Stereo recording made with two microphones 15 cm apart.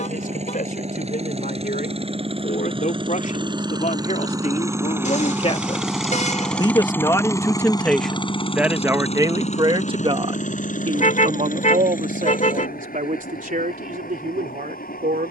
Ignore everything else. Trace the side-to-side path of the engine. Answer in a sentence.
You can hear the engine move from right to left.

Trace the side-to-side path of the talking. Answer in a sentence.
You can hear the talking go from the left side to the right.